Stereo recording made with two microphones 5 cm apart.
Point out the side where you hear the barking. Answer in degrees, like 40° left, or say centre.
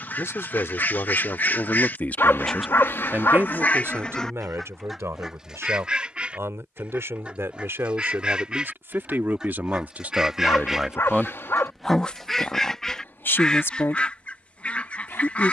50° left.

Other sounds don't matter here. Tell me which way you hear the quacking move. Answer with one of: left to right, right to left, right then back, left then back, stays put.
right then back.